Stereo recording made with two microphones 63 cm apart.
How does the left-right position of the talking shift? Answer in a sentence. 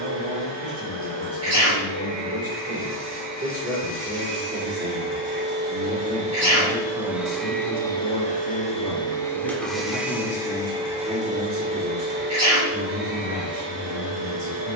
In this clip you hear the talking go left and come back.